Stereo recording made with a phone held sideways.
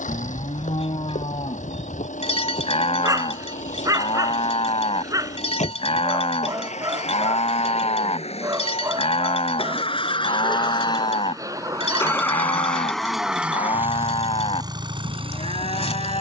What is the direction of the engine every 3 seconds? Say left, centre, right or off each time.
left, left, left, left, centre, right.